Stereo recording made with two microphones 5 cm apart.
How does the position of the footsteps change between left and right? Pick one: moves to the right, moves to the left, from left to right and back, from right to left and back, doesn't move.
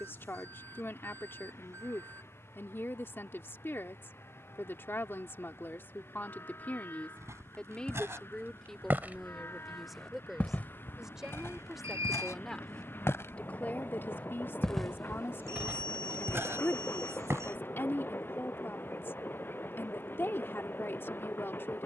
from right to left and back.